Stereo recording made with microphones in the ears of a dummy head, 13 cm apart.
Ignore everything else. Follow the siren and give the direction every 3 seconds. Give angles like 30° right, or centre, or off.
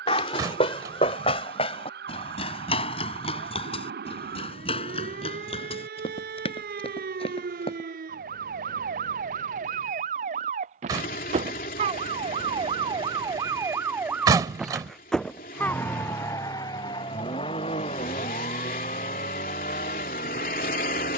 80° right, 80° right, 70° right, 50° right, 20° right, 20° left, 50° left.